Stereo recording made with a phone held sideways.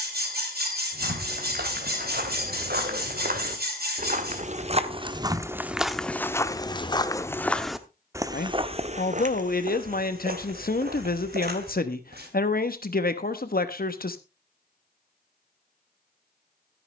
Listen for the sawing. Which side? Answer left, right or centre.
right.